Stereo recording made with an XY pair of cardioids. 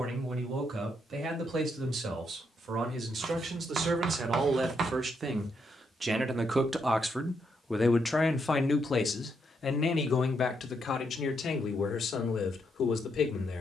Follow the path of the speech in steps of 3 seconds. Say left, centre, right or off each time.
right, right, centre, left, left.